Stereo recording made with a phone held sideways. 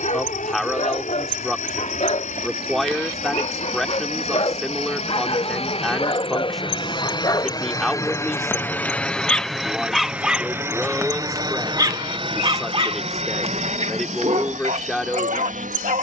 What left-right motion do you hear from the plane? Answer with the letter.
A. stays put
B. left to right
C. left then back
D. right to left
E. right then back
B.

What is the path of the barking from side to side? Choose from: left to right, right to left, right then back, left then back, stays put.
left to right.